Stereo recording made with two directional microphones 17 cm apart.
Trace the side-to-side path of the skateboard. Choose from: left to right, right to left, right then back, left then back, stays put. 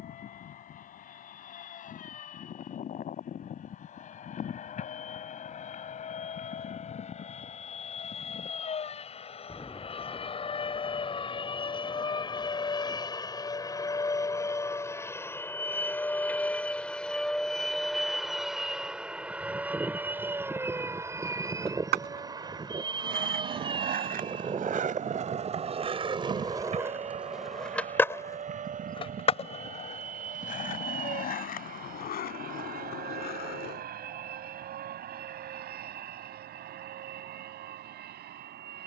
right to left.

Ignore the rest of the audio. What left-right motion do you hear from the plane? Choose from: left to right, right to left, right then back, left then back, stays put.
left to right.